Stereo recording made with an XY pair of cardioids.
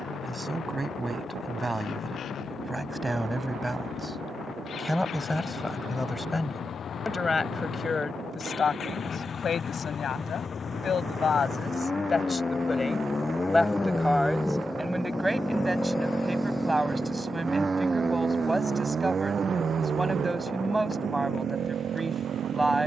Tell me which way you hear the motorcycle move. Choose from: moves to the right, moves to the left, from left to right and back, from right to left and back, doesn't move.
moves to the right.